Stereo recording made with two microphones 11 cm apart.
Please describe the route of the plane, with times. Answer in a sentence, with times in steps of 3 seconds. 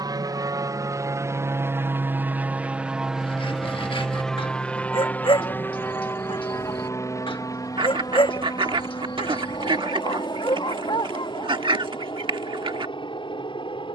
You can hear the plane on the right from 0 s, in the centre from 3 s and on the left from 6 s.